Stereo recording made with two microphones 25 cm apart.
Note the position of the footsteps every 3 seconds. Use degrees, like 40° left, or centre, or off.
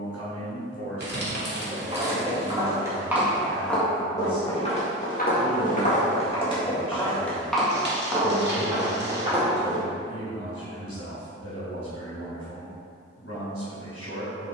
20° right, 20° left, centre, 20° right, off.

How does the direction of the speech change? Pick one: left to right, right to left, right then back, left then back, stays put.
stays put.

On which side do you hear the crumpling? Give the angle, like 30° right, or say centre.
40° right.